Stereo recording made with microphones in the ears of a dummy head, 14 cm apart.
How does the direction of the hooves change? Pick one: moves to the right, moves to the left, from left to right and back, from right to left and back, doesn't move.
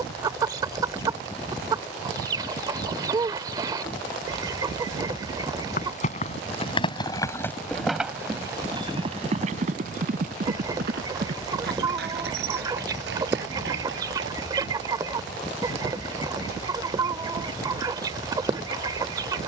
moves to the right.